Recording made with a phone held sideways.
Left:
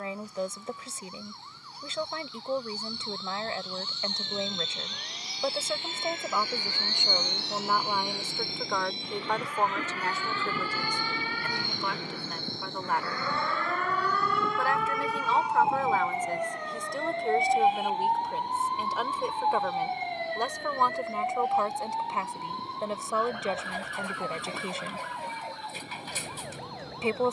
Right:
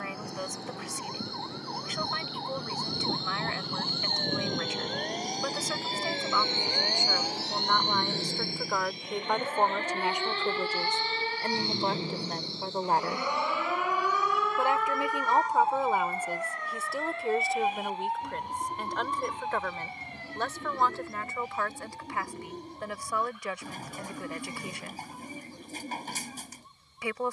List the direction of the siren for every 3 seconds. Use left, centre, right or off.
right, right, right, right, centre, left, left, left, left.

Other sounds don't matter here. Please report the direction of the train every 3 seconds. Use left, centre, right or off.
right, right, centre, left, left, left, left, left, left.